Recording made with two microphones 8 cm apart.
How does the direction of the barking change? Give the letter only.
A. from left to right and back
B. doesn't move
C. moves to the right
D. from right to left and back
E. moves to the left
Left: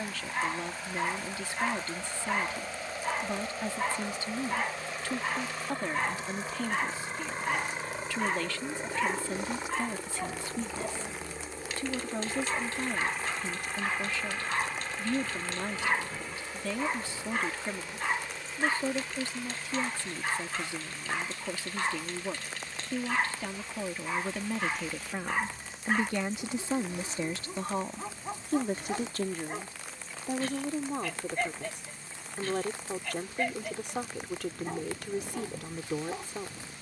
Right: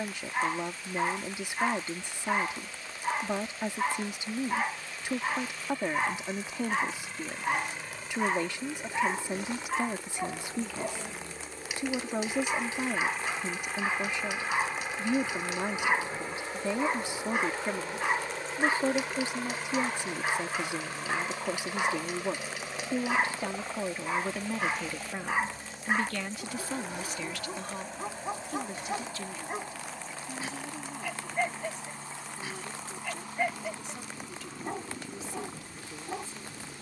B.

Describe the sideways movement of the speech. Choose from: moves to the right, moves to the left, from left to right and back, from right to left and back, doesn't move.
moves to the left.